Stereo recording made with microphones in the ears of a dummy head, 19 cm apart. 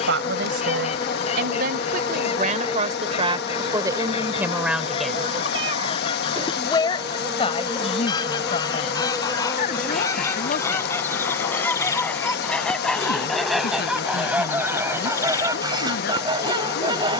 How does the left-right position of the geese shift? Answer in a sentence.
In this clip you hear the geese move from left to right.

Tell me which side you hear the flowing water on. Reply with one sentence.
You can hear the flowing water on the left.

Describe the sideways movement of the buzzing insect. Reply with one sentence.
You can hear the buzzing insect go right and come back.